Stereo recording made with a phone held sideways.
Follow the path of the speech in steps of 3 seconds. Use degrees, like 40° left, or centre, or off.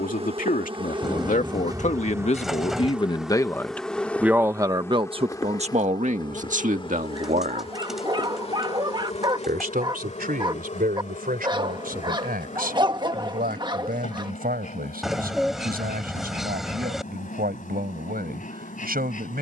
60° left, 20° right, 60° right, 80° right, 80° right, 80° right, 80° right.